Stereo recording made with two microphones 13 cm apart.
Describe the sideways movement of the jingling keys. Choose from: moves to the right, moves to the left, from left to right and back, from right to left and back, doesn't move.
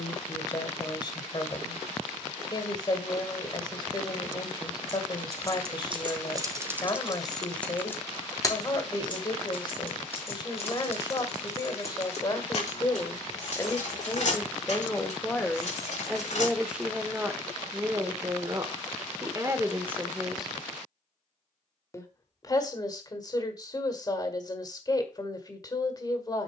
moves to the left.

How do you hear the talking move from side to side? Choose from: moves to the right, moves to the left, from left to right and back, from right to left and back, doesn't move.
from left to right and back.